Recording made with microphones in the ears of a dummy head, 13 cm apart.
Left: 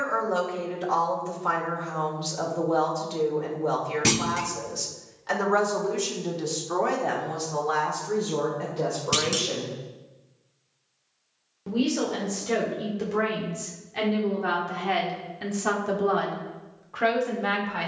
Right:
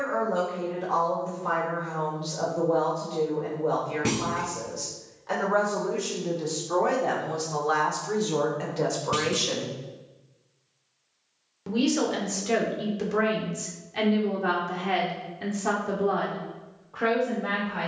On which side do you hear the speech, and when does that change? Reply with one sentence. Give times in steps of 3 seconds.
You can hear the speech on the left from 0 s, in the centre from 6 s, on the right from 9 s, in the centre from 12 s and on the left from 15 s.